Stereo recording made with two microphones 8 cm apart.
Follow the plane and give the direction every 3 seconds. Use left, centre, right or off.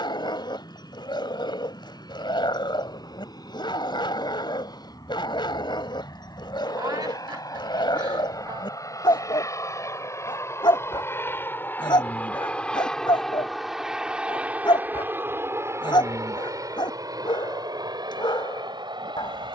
left, left, left, left, centre, right, right.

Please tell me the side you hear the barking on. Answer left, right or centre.
left.